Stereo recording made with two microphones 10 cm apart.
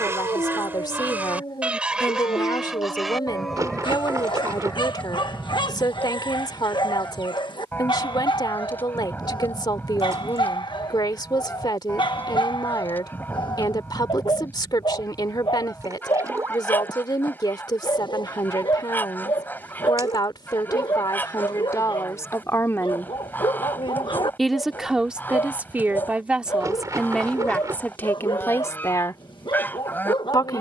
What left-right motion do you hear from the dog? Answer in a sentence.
In this clip you hear the dog stay put.